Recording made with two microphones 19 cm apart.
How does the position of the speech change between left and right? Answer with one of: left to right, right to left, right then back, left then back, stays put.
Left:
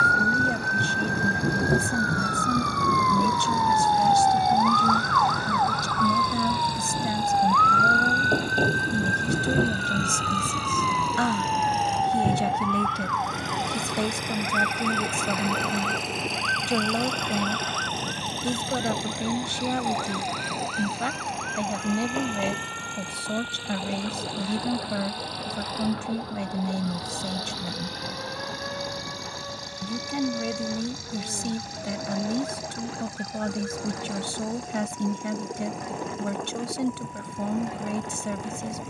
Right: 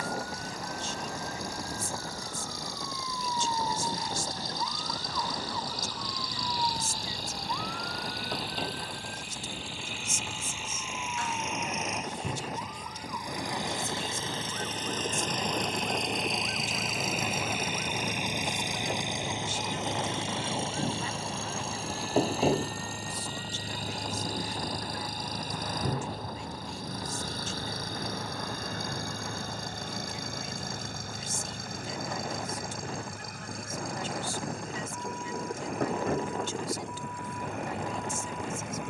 stays put.